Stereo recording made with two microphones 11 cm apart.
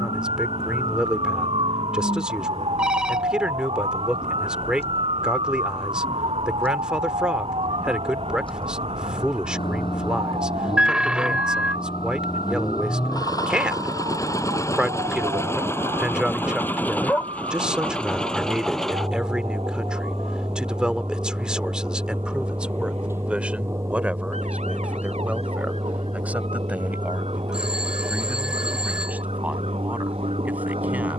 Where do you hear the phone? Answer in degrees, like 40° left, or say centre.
10° right.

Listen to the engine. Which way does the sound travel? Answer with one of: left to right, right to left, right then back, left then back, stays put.
left to right.